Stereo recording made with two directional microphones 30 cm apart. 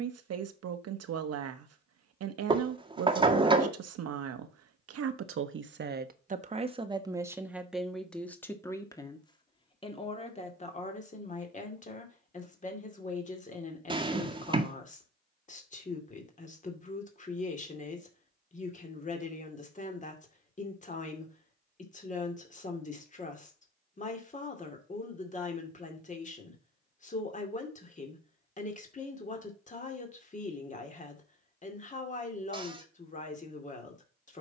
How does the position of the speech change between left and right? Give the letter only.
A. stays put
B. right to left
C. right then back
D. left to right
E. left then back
B.